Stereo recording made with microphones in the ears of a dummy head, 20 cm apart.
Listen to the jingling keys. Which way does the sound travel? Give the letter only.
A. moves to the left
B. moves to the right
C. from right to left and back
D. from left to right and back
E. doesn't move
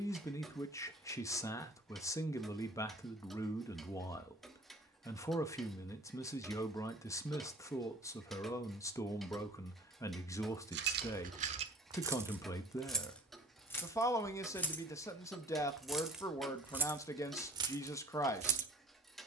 C.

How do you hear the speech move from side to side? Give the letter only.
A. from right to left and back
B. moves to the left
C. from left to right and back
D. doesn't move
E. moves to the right
D.